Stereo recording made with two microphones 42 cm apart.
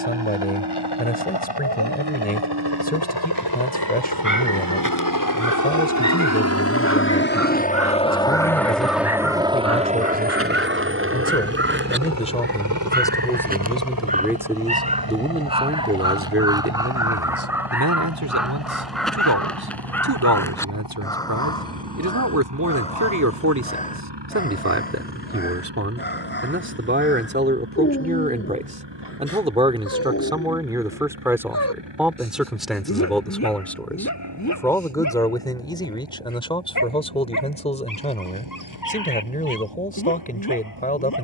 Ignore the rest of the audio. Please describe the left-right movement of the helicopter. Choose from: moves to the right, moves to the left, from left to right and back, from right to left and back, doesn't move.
moves to the right.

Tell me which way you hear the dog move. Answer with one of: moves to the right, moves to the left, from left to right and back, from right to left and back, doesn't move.
moves to the left.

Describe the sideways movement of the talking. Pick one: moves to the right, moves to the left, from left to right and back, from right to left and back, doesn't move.
from left to right and back.